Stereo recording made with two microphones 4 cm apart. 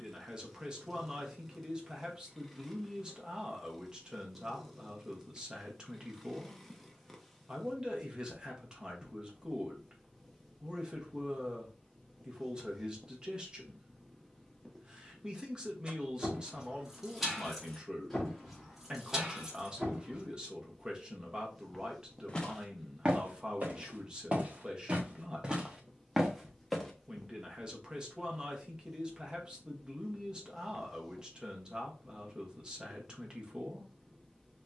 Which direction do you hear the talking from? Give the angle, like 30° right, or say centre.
20° right.